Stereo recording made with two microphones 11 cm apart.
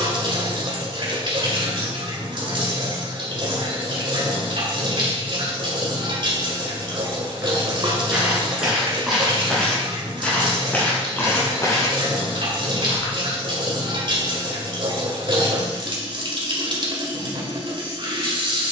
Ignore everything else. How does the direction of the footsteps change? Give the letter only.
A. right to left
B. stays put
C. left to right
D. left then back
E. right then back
A.